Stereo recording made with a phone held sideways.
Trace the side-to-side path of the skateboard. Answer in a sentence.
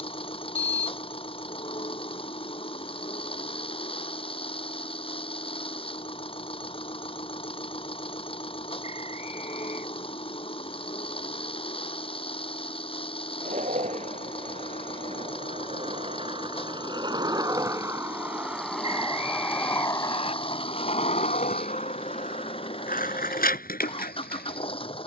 In this clip you hear the skateboard move to the left.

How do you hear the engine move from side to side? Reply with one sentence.
You can hear the engine stay in one place.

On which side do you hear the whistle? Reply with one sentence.
You can hear the whistle on the left.